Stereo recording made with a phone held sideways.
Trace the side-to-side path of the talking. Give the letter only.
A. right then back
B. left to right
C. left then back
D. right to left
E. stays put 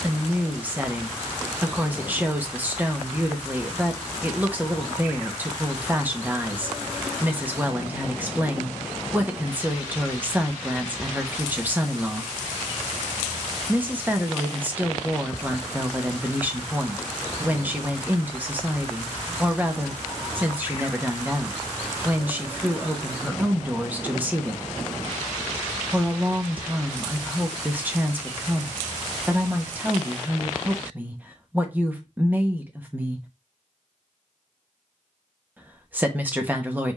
E.